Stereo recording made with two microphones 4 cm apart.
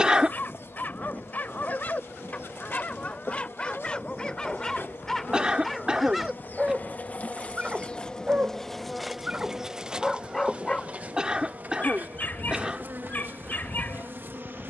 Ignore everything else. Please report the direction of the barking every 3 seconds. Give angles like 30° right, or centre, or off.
40° left, 20° left, 20° right, 10° left, 50° left.